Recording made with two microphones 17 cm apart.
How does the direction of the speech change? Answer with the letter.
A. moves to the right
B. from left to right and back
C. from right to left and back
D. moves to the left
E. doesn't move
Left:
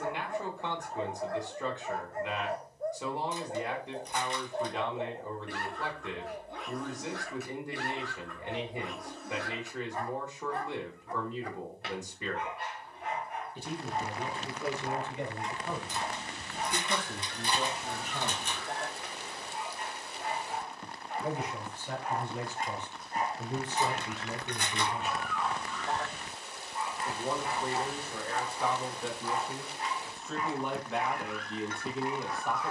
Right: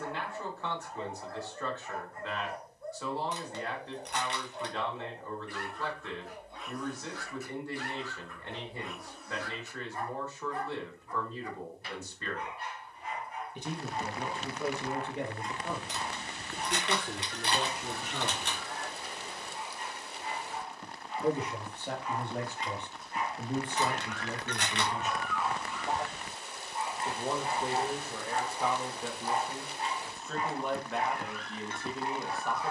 B.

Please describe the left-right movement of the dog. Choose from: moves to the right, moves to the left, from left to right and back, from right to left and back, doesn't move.
moves to the right.